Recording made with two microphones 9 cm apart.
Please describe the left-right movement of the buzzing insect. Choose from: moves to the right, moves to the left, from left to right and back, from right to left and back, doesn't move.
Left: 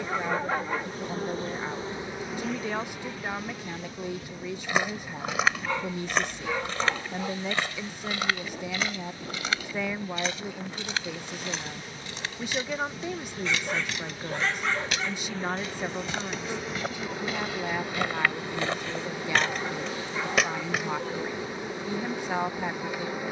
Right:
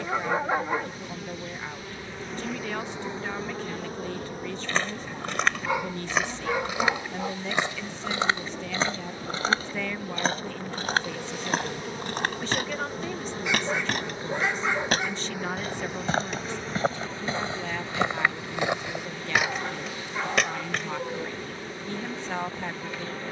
from left to right and back.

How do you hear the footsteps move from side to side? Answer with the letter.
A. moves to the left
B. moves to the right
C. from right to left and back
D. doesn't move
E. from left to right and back
E.